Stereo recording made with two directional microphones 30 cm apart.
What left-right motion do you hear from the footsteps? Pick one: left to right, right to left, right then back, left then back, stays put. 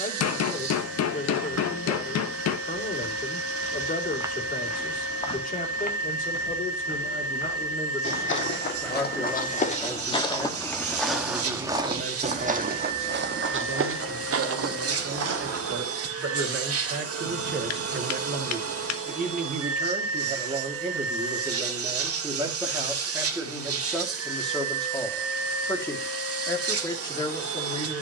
left then back.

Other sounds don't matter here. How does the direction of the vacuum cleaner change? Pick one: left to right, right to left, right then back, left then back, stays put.
stays put.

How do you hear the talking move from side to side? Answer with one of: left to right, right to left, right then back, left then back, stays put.
right then back.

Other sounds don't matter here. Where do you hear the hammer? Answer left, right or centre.
left.